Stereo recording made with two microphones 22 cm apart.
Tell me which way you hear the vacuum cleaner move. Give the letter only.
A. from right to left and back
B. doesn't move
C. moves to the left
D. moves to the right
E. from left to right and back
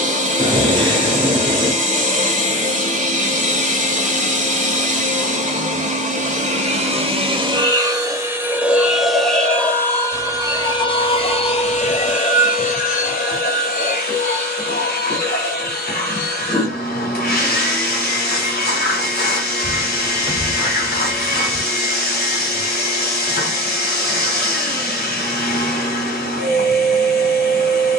C.